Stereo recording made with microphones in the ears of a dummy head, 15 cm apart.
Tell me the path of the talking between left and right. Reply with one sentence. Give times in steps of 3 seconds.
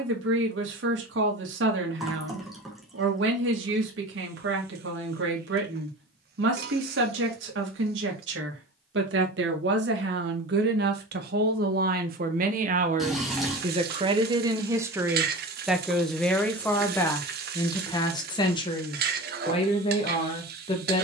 In this clip you hear the talking on the right from 0 s, in the centre from 15 s and on the left from 18 s.